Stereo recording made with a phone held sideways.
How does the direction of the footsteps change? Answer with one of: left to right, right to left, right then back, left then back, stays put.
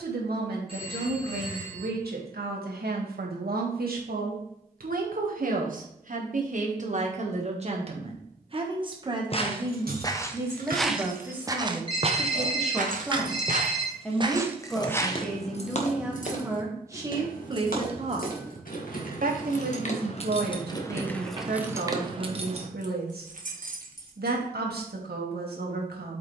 right then back.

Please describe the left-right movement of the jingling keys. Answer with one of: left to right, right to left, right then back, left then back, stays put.
left then back.